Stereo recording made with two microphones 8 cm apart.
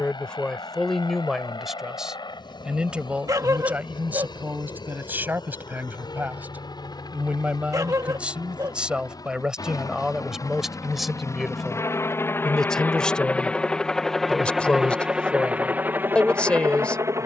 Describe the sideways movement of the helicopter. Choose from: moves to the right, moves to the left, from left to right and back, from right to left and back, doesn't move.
moves to the right.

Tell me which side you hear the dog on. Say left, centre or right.
right.